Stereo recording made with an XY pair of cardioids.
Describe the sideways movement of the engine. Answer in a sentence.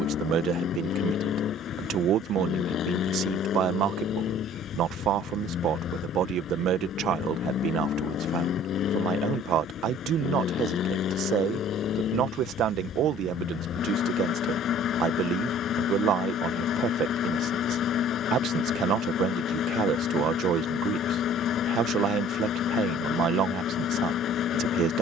You can hear the engine stay put.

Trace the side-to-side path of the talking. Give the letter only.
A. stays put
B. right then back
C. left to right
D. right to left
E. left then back
A.